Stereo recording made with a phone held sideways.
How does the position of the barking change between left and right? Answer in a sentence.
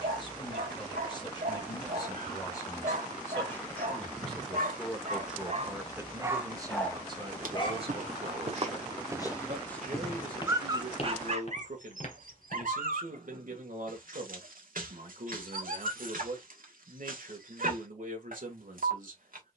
In this clip you hear the barking move from right to left and back again.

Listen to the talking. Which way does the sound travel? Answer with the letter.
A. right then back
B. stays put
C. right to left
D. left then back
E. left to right
E.